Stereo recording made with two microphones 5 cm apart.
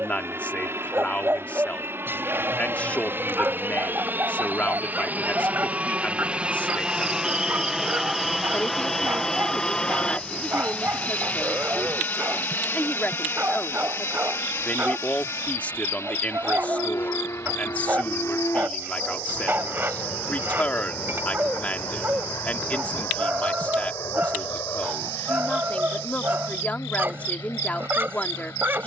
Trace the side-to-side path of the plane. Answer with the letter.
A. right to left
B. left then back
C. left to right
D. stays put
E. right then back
A.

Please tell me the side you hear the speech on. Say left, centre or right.
left.